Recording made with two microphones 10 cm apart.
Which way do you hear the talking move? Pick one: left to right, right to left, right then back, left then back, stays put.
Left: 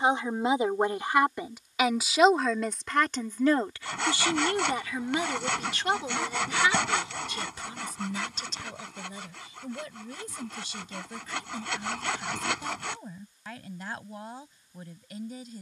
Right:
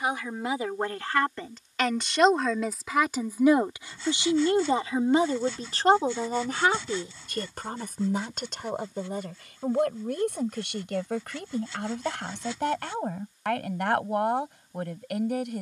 left to right.